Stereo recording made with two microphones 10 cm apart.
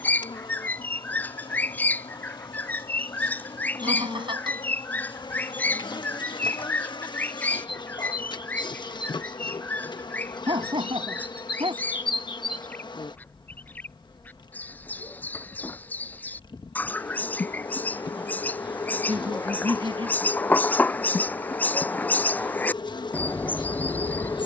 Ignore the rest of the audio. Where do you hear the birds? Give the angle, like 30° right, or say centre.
20° left.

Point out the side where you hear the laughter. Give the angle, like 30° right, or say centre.
60° right.